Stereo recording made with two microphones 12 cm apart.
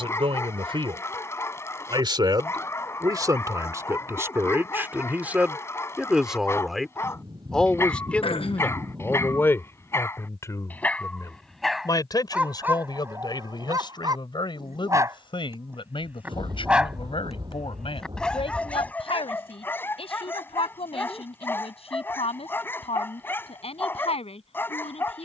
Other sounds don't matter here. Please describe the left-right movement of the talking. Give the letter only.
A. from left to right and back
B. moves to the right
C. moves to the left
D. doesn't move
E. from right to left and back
C.